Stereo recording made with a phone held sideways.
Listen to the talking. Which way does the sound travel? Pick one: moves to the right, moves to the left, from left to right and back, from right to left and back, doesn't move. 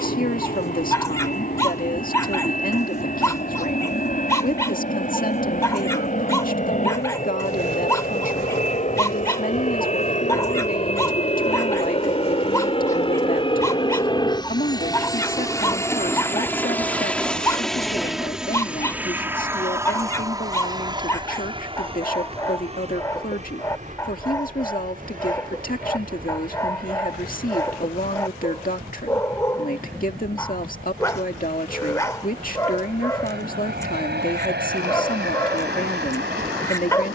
doesn't move.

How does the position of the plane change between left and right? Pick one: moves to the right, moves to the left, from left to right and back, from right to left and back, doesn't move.
moves to the right.